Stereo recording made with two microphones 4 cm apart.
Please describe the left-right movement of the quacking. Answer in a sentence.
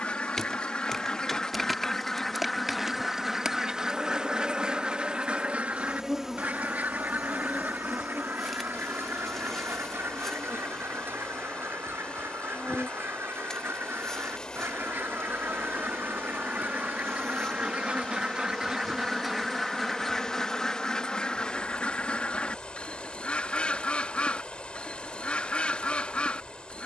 You can hear the quacking go right and come back.